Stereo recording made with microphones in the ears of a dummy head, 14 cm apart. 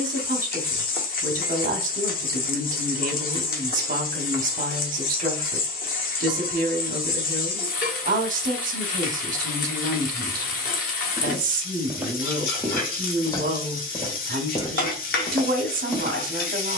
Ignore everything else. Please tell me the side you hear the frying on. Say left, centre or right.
left.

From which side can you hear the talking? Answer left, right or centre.
right.